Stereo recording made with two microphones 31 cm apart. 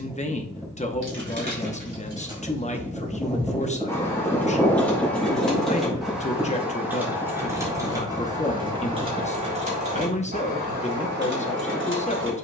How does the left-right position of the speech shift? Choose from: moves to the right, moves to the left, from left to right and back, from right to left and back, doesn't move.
doesn't move.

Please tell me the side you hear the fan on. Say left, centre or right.
centre.